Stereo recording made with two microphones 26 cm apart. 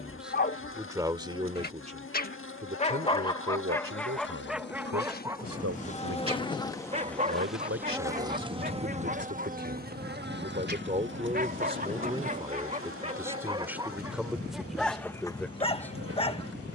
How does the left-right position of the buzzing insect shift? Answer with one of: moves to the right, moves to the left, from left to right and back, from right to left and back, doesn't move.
moves to the right.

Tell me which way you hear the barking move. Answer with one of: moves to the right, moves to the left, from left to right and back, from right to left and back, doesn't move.
from left to right and back.